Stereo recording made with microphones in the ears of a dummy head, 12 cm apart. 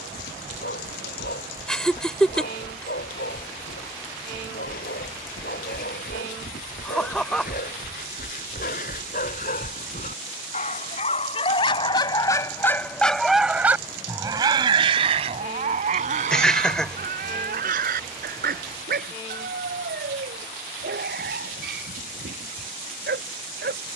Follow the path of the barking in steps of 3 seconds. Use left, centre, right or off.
left, left, left, left, centre, right, right, right.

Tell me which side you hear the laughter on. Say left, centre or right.
centre.